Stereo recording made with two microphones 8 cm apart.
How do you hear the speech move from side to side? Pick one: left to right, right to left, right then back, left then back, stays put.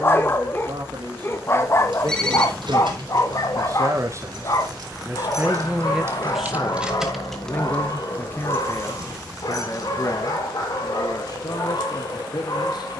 right to left.